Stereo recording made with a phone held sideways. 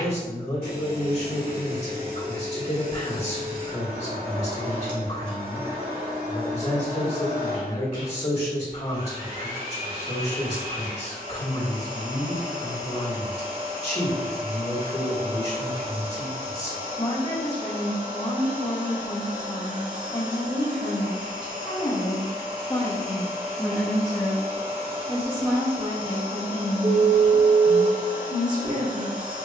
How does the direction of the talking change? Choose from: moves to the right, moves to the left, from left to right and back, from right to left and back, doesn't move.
moves to the right.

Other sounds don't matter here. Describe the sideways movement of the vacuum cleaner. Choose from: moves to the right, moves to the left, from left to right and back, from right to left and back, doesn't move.
doesn't move.